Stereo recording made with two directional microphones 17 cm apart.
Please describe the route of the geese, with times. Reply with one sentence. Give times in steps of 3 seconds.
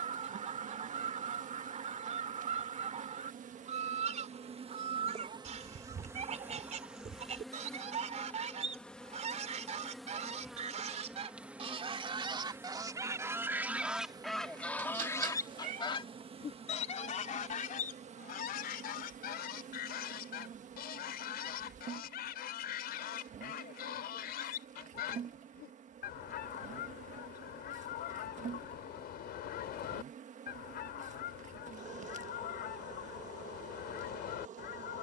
You can hear the geese on the right from 0 s, in the centre from 12 s and on the left from 15 s.